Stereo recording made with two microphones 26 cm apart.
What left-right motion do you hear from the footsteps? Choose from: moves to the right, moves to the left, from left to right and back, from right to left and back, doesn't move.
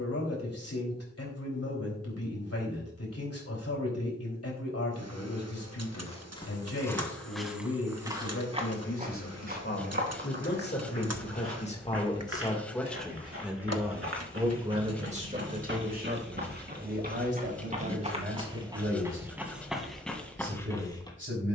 from left to right and back.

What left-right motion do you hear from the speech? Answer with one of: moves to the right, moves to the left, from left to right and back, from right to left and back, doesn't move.
moves to the right.